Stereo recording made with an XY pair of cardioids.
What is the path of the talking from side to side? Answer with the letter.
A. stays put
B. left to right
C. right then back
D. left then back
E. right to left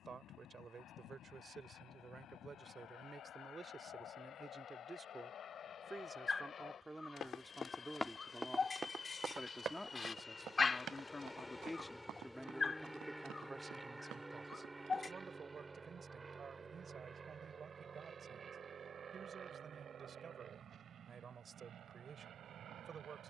D.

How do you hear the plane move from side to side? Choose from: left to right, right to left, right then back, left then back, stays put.
left to right.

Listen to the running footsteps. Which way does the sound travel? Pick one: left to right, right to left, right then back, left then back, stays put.
left to right.